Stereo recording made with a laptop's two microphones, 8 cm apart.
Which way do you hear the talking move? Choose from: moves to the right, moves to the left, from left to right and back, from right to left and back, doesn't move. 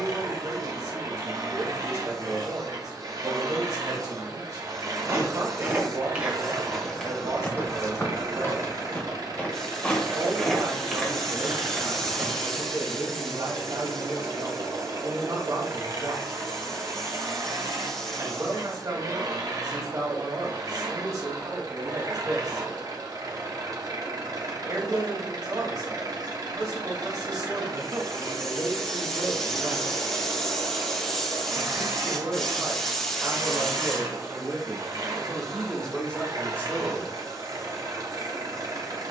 moves to the left.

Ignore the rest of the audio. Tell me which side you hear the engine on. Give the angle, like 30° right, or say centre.
50° right.